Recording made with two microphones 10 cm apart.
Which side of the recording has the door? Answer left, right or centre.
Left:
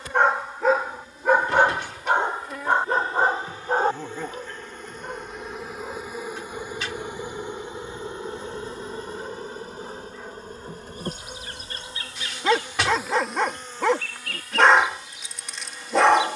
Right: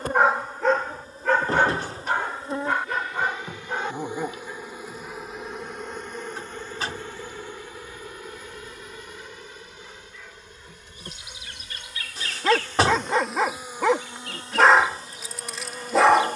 right.